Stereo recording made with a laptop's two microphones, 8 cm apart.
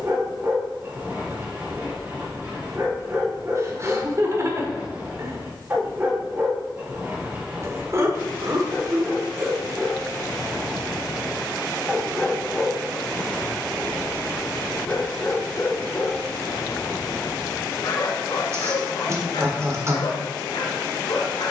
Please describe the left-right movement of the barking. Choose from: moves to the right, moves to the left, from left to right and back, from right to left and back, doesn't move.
moves to the left.